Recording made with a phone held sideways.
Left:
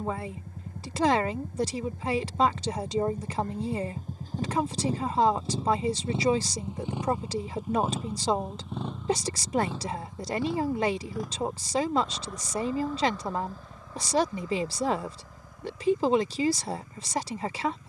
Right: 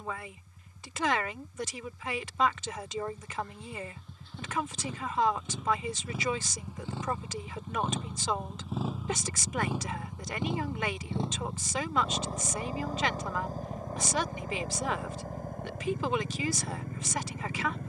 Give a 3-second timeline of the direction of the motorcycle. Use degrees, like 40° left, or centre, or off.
60° left, 40° left, 10° left, 20° right, 40° right, 50° right.